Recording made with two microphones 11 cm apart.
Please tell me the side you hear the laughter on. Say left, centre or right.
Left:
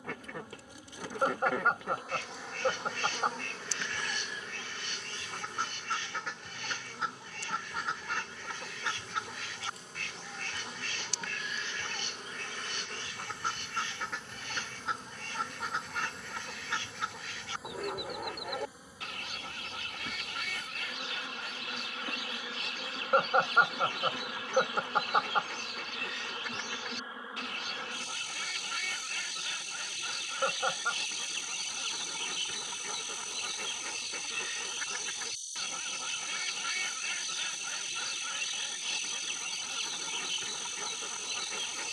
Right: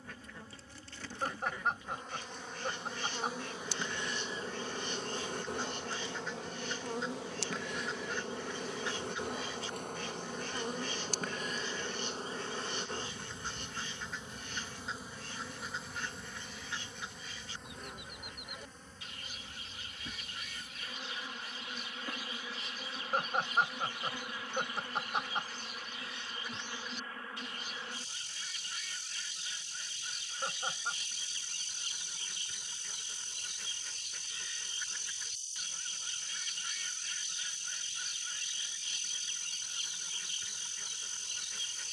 left.